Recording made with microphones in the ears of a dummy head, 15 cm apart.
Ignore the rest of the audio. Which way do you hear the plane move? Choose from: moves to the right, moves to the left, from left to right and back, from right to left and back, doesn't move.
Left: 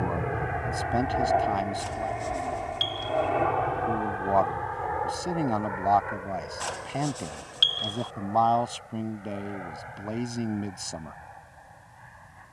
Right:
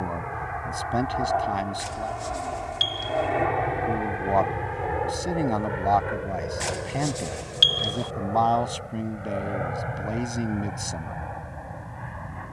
moves to the right.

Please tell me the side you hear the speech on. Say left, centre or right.
centre.